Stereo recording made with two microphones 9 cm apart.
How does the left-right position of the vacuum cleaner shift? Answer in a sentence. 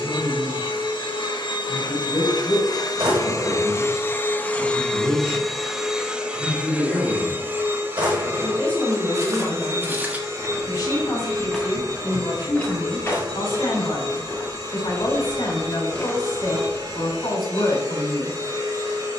In this clip you hear the vacuum cleaner travel towards the right.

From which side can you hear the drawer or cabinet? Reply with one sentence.
In this clip you hear the drawer or cabinet on the right.